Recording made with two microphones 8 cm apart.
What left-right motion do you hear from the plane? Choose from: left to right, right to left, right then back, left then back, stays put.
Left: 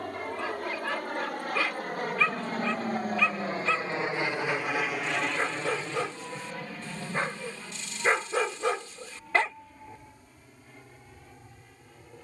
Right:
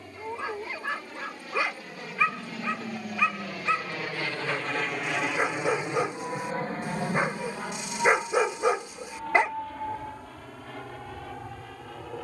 left to right.